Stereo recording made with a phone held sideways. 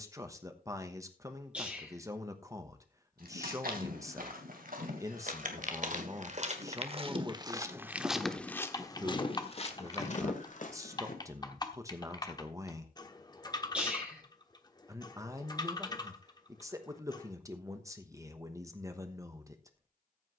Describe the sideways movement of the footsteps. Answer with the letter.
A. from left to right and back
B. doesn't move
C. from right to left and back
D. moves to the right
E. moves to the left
E.